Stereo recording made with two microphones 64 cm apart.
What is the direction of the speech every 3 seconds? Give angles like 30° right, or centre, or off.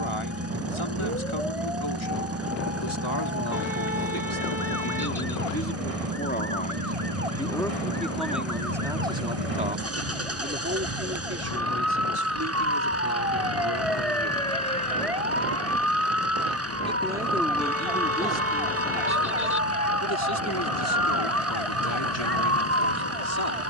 50° left, 30° left, centre, 20° right, 30° right, centre, 20° left, 40° left.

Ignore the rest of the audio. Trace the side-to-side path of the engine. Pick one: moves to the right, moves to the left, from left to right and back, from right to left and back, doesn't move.
doesn't move.